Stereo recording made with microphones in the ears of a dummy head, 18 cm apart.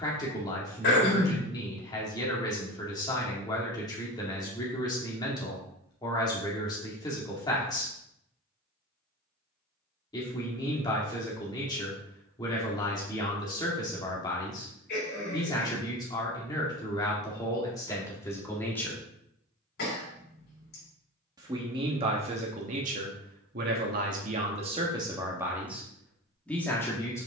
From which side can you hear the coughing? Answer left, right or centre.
left.